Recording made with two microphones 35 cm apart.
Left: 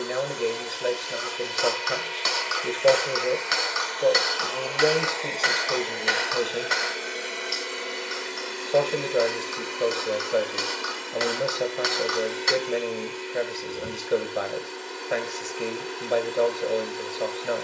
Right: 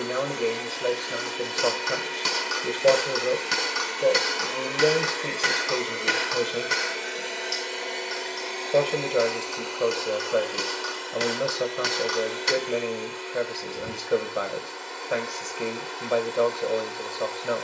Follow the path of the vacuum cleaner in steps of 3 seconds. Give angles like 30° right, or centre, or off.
60° right, 30° right, 10° left, 30° left, 40° left, 40° left.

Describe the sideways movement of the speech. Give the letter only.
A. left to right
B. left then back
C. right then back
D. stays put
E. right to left
D.